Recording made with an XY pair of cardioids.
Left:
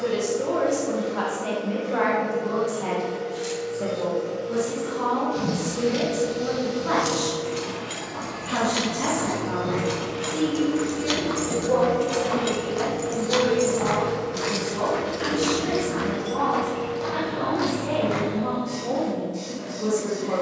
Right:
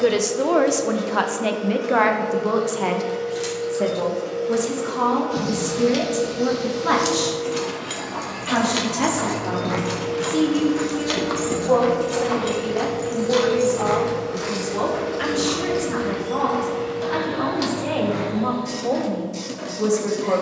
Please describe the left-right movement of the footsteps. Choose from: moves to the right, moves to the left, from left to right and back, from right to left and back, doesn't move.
moves to the left.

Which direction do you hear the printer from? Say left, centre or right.
right.